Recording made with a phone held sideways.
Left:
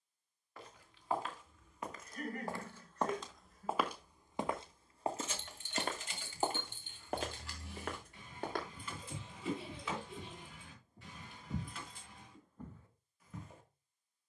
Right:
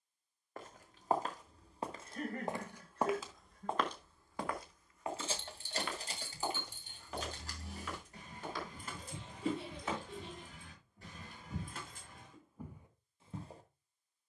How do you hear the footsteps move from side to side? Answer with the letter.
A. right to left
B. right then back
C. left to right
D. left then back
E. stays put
D.